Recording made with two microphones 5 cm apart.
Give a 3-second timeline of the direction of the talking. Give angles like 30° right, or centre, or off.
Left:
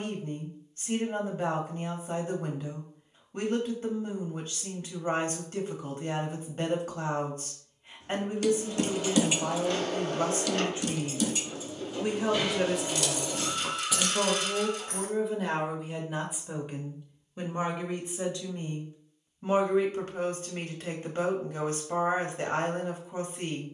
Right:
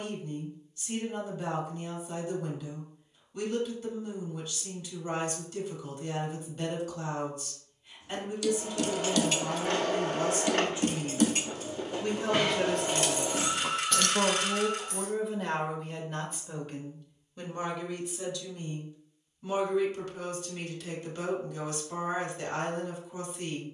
40° left, 40° left, 40° left, 40° left, centre, 10° left, 40° left, 40° left.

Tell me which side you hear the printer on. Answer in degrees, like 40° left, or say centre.
50° right.